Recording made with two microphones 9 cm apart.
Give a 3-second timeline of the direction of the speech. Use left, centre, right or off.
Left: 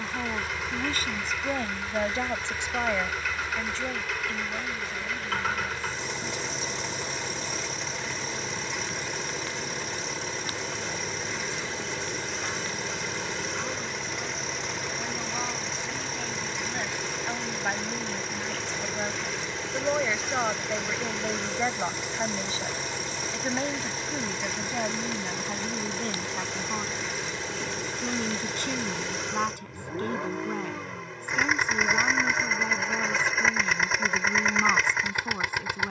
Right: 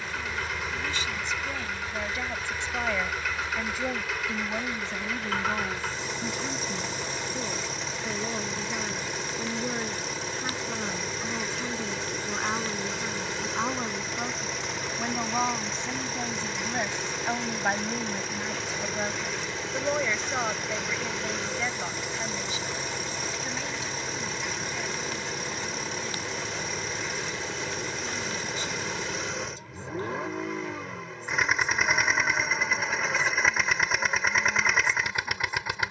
left, right, right, right, right, right, centre, left, left, left, left, left.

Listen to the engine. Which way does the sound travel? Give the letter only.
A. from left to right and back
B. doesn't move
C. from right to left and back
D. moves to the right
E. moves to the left
B.